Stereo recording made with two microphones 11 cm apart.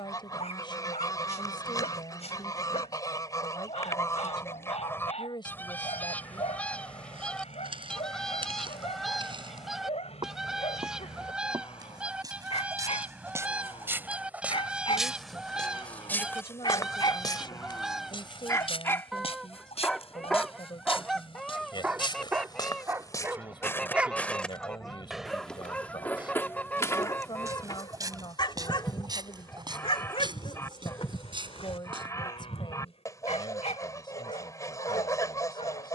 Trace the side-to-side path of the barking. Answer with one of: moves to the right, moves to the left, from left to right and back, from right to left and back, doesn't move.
from left to right and back.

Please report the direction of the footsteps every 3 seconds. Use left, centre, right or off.
off, off, right, right, right, left, left, left, centre, right, right, off.